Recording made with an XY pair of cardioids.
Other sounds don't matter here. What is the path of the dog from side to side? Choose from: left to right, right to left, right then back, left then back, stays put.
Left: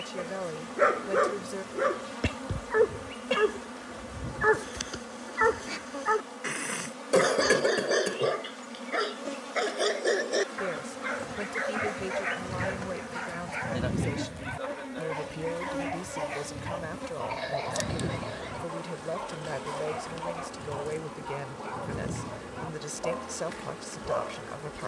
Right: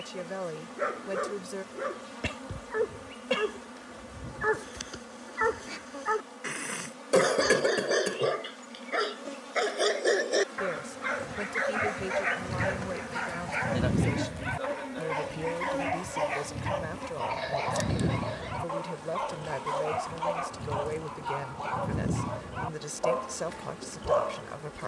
left to right.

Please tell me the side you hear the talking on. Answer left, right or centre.
centre.